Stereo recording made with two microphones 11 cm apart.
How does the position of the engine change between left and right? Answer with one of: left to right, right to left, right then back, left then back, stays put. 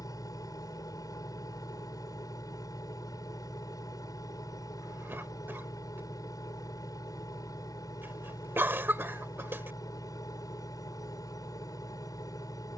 stays put.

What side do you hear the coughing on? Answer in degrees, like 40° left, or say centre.
20° right.